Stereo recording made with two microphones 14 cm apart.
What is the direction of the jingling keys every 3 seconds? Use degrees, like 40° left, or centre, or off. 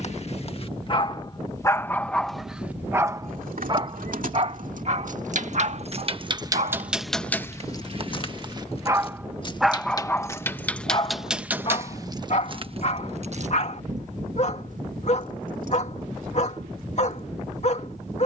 off, 70° right, 10° left, 10° left, 50° right, 80° right.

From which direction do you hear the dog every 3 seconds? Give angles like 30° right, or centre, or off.
20° left, 40° right, 50° right, 20° left, 50° left, 50° left.